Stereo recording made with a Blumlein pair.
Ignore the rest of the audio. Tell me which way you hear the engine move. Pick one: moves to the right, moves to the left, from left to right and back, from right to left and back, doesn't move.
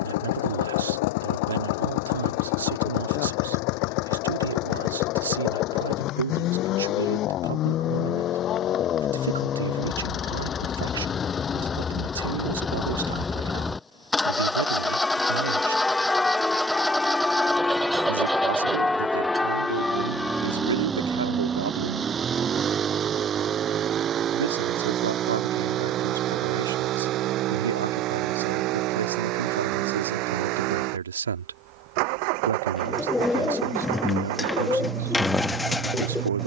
moves to the right.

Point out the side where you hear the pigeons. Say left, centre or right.
centre.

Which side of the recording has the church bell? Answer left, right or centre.
centre.